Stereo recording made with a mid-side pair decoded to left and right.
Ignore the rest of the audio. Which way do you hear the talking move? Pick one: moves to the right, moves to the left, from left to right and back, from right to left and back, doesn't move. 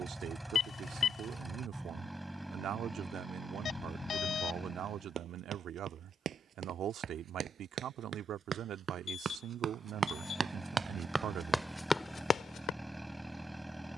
doesn't move.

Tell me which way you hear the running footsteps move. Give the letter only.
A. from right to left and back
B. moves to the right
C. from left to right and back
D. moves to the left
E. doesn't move
D.